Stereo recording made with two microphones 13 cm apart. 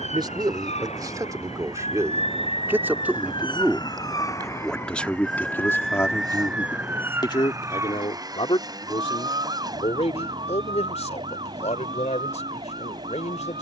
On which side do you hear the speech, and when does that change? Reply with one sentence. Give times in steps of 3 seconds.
You can hear the speech on the right from 0 s, in the centre from 3 s and on the left from 6 s.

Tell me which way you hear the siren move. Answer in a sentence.
You can hear the siren travel towards the right.